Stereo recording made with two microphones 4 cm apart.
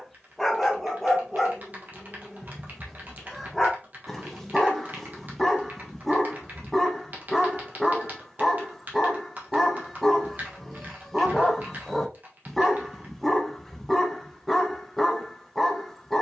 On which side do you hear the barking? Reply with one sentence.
You can hear the barking in the centre.